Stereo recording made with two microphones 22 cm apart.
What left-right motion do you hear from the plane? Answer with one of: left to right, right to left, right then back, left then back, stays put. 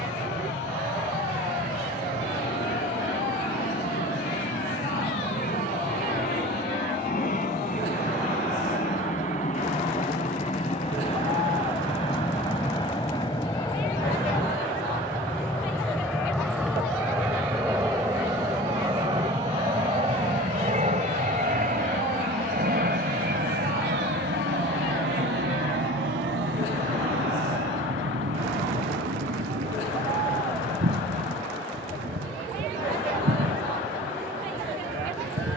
left to right.